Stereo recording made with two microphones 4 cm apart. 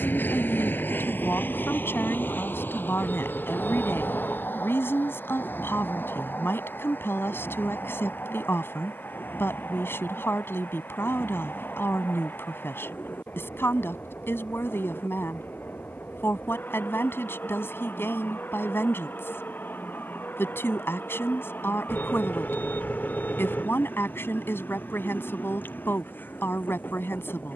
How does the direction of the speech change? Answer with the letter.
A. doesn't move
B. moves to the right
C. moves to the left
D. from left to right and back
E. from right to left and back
A.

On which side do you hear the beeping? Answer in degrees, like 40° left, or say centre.
50° left.